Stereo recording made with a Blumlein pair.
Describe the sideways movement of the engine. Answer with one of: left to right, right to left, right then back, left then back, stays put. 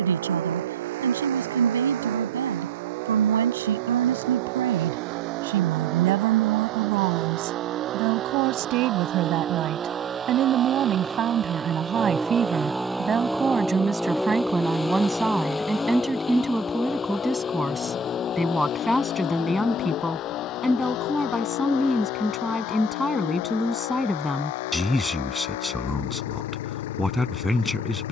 right to left.